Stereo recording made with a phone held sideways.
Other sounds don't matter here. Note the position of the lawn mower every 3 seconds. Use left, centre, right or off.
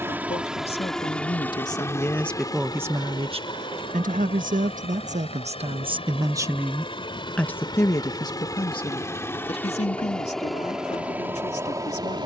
centre, left, left, centre.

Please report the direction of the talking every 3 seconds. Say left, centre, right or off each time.
left, right, centre, left.